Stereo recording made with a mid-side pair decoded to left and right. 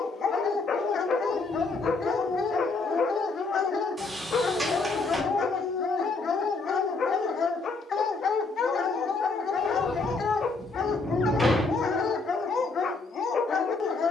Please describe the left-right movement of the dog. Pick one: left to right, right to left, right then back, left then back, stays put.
stays put.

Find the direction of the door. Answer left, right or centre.
centre.